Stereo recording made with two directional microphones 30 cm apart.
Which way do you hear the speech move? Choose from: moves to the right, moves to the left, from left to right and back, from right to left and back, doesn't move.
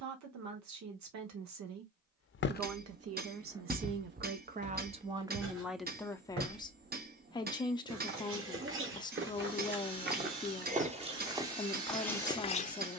moves to the left.